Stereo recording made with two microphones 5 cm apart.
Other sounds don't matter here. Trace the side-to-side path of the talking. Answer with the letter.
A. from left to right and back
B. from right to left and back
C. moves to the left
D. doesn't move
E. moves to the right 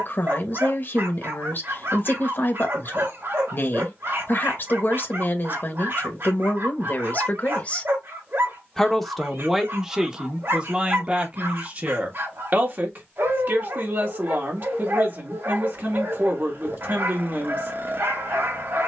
E.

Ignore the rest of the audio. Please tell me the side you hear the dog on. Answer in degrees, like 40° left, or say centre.
60° right.